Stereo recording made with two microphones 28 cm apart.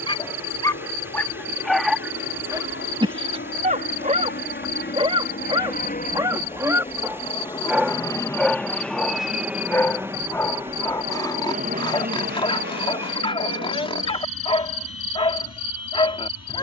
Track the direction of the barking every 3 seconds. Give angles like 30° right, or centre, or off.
centre, 20° right, 10° right, 10° left, 20° left, 20° left.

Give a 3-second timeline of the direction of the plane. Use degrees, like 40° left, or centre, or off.
50° left, 40° left, 20° left, 20° right, 40° right, 60° right.